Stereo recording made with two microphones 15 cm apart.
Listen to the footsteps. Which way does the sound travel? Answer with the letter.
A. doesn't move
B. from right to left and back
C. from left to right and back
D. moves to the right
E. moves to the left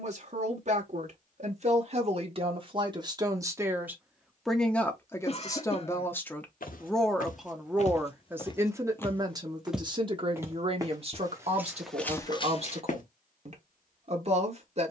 C.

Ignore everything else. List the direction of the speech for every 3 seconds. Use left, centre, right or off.
right, centre, centre, right, right.